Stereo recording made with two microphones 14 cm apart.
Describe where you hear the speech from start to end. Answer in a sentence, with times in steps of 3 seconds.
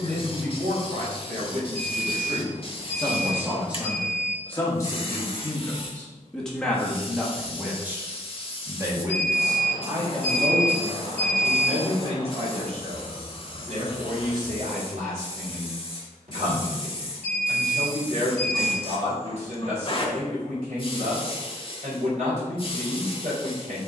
You can hear the speech on the right from 0 s, in the centre from 3 s and on the right from 9 s.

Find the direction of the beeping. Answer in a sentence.
You can hear the beeping on the right.